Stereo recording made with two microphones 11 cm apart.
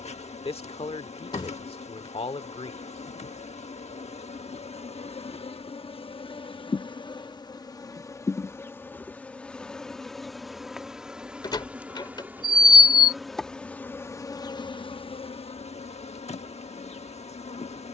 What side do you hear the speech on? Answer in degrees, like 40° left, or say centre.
60° left.